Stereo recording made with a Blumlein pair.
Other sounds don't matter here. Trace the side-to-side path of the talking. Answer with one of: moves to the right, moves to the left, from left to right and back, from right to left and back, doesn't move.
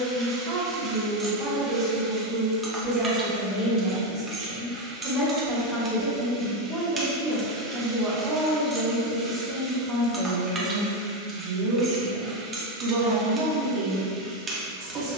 from right to left and back.